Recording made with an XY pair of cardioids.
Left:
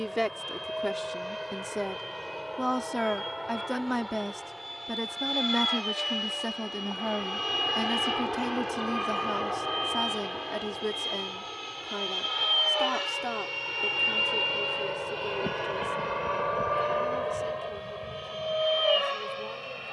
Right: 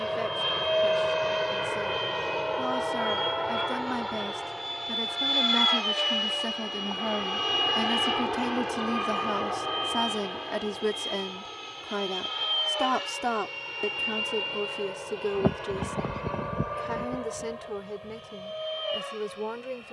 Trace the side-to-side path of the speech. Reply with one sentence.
You can hear the speech move to the right.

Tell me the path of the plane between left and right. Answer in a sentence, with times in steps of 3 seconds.
In this clip you hear the plane on the right from 0 s, in the centre from 6 s and on the left from 12 s.